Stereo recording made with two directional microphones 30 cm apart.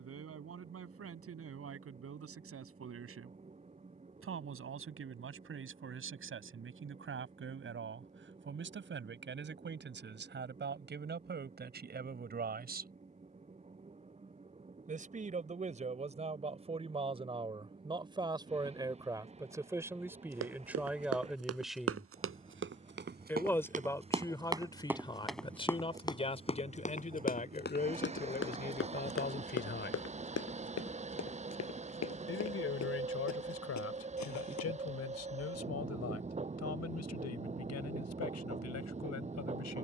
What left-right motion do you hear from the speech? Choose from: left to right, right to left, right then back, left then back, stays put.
right to left.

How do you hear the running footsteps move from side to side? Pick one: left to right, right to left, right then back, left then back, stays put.
right to left.